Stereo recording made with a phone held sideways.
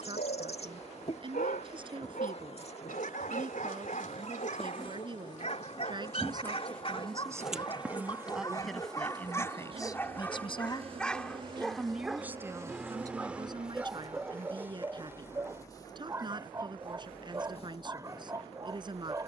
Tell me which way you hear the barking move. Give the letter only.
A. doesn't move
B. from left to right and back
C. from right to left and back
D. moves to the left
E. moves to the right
E.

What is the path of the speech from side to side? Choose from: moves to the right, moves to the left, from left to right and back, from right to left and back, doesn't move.
from right to left and back.